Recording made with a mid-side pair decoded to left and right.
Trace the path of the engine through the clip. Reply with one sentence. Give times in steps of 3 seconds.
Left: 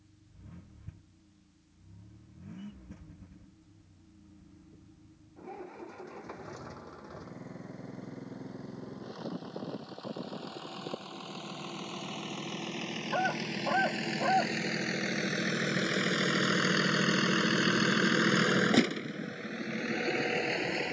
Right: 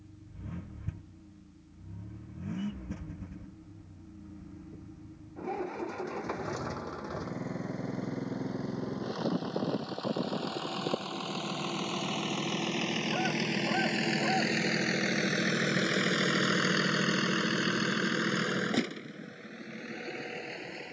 You can hear the engine on the right from 0 s, in the centre from 15 s and on the left from 18 s.